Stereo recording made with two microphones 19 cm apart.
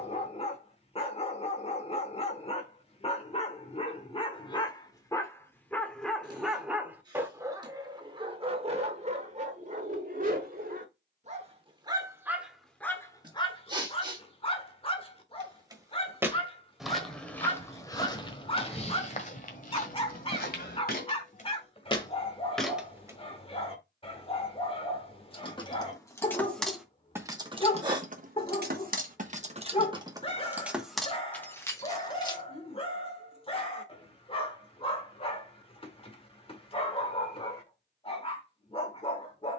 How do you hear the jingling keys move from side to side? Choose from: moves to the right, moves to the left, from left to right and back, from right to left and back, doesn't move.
from left to right and back.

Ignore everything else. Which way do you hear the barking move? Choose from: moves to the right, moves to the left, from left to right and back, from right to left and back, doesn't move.
from left to right and back.